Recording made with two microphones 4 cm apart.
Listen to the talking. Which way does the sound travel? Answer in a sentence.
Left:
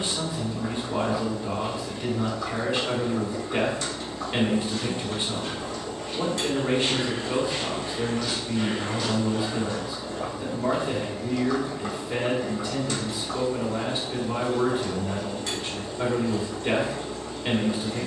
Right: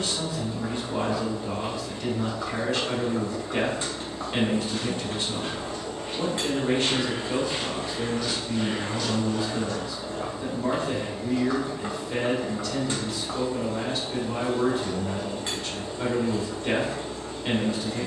You can hear the talking stay in one place.